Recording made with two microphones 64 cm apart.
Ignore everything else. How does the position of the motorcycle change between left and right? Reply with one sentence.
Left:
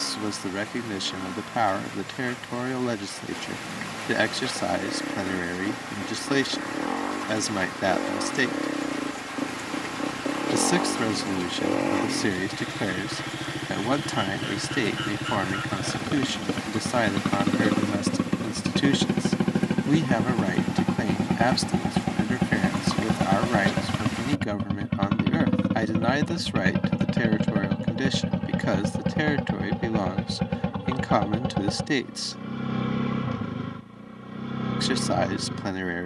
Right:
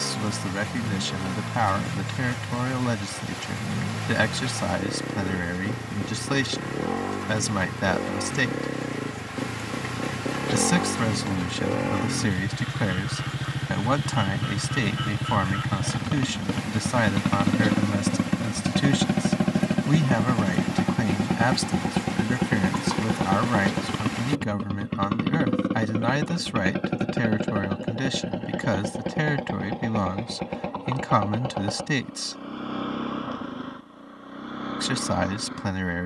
You can hear the motorcycle go from the right side to the left.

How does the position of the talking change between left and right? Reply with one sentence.
You can hear the talking stay in one place.